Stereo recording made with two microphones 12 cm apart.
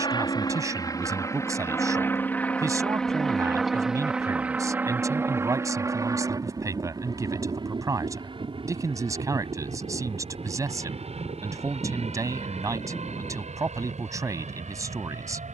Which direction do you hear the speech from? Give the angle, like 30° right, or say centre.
30° right.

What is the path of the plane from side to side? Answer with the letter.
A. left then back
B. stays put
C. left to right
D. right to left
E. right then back
C.